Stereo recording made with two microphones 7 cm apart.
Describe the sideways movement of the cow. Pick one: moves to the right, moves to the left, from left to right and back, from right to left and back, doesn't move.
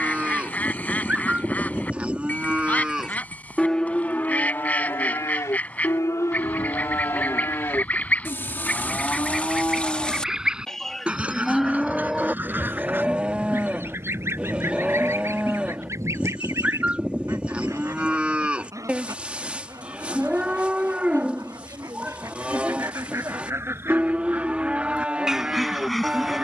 from right to left and back.